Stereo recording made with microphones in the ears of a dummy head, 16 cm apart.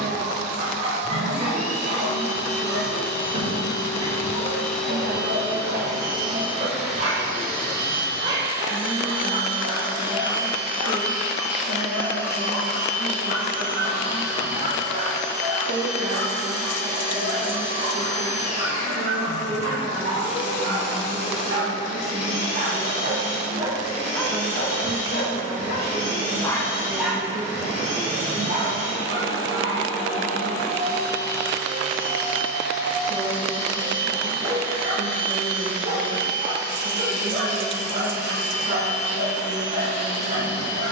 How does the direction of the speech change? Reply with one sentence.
In this clip you hear the speech go left and come back.